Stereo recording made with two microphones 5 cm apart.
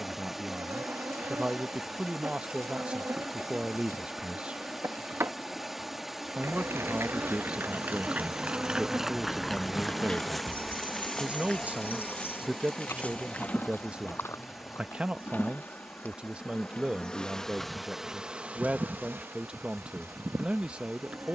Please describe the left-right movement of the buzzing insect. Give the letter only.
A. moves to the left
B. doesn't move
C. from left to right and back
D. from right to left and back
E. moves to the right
D.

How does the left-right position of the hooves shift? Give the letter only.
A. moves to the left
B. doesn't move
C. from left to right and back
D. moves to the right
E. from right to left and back
A.